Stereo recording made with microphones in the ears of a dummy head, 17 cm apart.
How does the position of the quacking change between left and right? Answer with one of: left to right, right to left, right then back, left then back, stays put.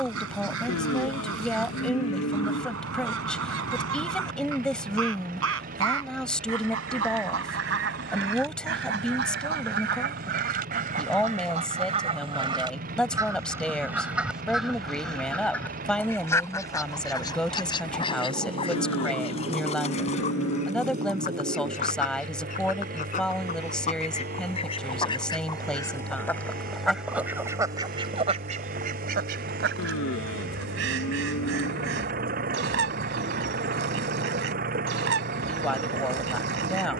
left then back.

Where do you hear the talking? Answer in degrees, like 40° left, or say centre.
centre.